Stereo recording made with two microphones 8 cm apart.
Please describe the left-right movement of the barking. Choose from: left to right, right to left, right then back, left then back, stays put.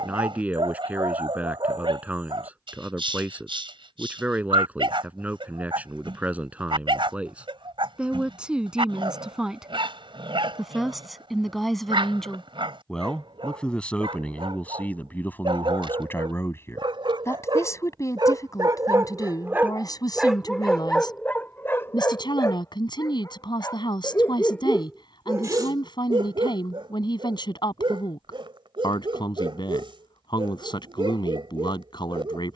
left then back.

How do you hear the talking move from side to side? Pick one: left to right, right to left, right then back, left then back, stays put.
right to left.